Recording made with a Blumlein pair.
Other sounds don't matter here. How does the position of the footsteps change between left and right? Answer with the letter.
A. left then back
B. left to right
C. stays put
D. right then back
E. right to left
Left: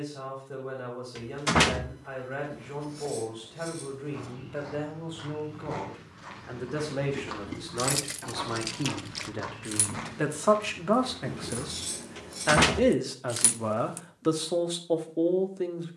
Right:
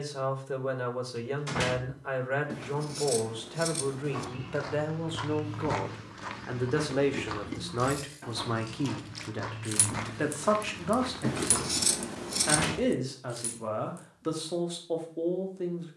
A.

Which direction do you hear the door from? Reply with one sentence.
You can hear the door on the left.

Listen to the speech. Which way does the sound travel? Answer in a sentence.
In this clip you hear the speech go from the right side to the left.